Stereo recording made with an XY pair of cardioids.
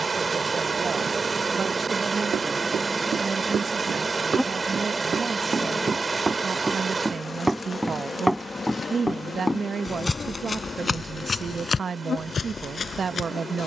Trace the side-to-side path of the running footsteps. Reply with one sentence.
In this clip you hear the running footsteps go from the right side to the left.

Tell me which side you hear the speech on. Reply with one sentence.
In this clip you hear the speech on the right.